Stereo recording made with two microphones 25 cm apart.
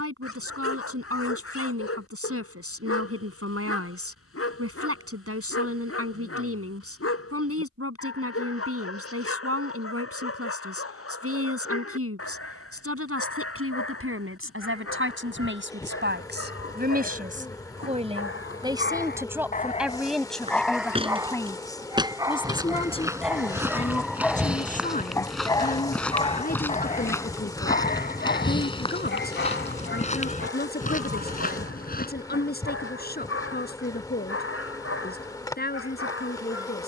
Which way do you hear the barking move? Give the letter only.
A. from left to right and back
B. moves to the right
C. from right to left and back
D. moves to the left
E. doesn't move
A.